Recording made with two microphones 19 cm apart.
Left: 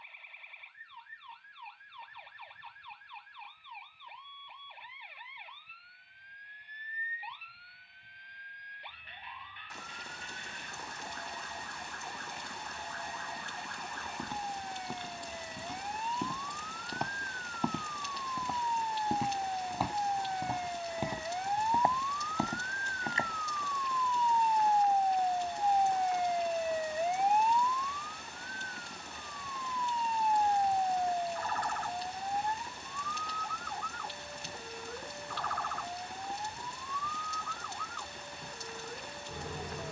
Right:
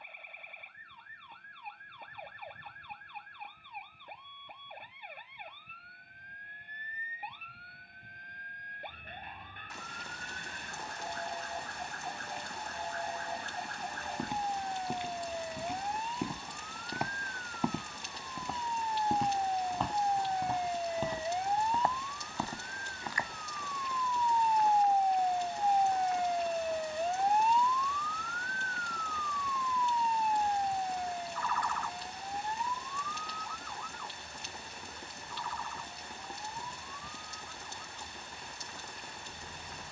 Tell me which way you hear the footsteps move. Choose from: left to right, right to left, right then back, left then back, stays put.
right to left.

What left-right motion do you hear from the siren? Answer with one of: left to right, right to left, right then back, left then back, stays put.
right to left.